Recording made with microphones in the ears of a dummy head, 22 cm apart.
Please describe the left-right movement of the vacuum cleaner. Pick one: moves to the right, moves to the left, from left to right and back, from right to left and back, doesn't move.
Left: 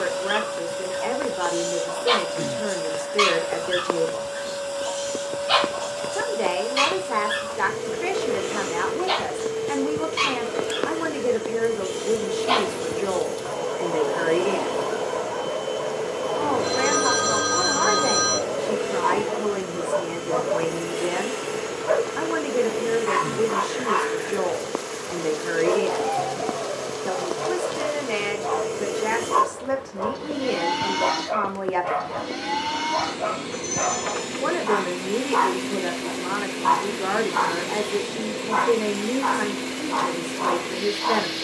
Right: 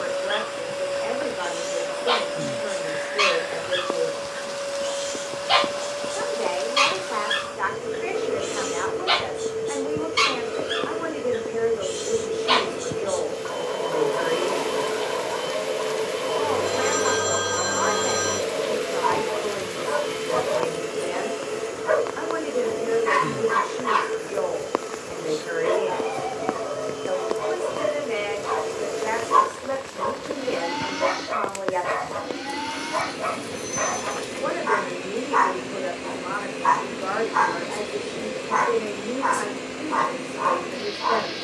doesn't move.